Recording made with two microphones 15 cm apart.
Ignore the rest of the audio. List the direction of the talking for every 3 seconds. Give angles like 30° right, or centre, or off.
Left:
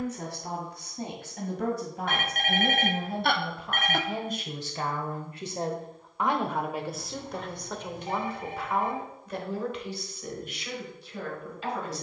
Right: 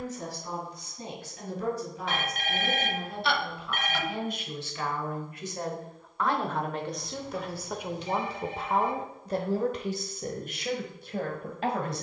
60° left, 40° left, 10° right, 50° right.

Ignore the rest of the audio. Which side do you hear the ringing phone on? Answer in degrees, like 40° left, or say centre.
60° left.